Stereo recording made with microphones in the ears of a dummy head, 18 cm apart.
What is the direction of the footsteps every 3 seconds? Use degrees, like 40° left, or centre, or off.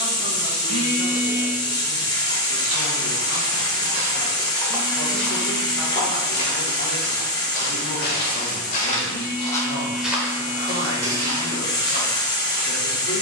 60° right, 20° right, 50° left, 10° right, 50° right.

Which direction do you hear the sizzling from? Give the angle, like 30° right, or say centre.
20° left.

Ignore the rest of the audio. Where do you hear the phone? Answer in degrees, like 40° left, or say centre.
40° left.